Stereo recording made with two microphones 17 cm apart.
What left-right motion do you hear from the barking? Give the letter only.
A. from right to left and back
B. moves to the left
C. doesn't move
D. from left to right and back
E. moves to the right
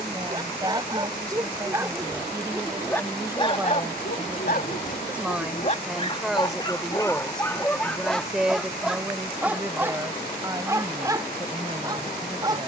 A.